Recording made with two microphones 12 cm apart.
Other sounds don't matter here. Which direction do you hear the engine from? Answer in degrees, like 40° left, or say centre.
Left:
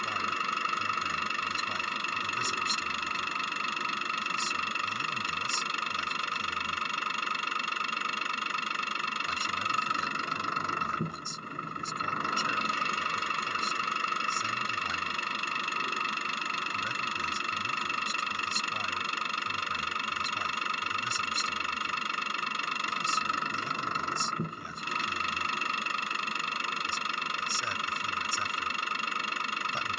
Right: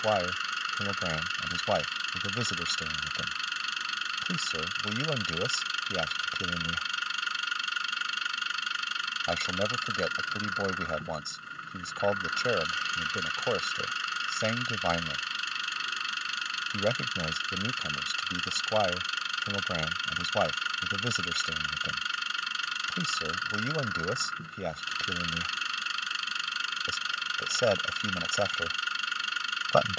50° left.